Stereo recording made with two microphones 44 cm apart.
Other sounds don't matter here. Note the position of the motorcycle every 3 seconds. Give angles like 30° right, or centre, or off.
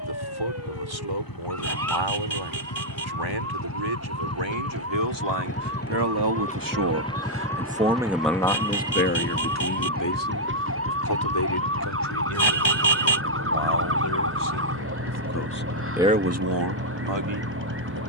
50° left, 30° left, 10° left, 20° right, 50° right, 60° right.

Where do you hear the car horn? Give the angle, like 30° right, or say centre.
70° left.